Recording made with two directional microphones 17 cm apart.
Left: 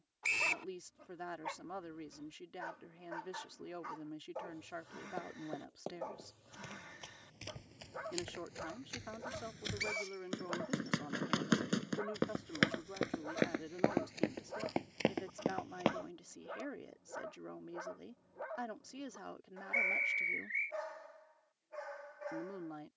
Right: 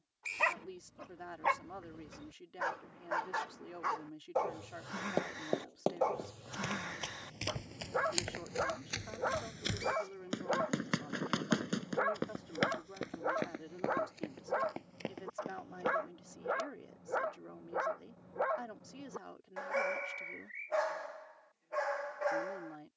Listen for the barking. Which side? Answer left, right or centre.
right.